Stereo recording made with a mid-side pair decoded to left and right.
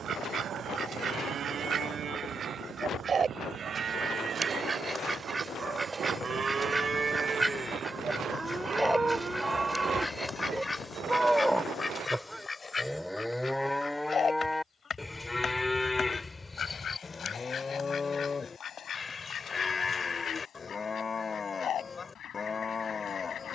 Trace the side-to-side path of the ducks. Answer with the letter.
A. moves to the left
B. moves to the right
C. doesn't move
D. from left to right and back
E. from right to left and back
A.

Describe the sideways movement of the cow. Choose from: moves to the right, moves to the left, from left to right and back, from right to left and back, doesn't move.
moves to the left.